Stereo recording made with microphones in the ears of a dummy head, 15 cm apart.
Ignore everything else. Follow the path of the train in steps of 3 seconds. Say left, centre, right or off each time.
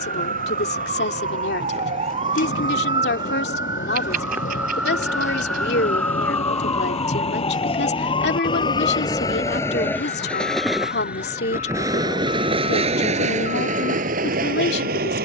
left, left, left, centre, right.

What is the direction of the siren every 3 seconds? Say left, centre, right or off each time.
right, centre, left, left, left.